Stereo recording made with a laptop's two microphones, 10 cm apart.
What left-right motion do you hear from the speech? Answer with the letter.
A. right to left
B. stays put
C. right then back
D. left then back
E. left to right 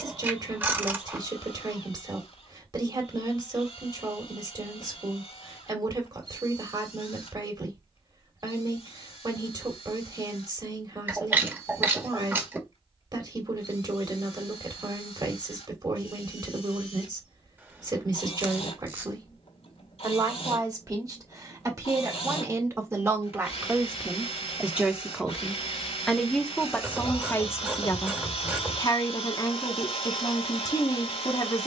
A.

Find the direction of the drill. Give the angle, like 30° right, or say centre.
70° left.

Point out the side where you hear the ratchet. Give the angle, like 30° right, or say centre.
20° right.